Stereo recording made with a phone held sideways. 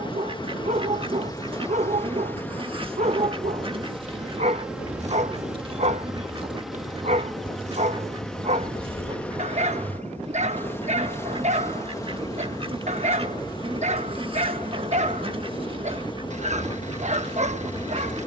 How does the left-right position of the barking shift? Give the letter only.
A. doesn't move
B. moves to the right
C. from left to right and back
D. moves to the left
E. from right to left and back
A.